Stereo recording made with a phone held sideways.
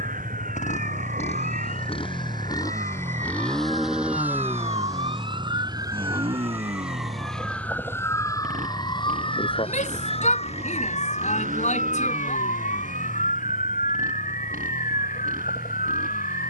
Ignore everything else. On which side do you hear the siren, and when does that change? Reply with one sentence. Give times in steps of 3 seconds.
You can hear the siren on the right from 0 s, in the centre from 6 s and on the left from 9 s.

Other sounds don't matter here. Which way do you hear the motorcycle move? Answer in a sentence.
You can hear the motorcycle move to the right.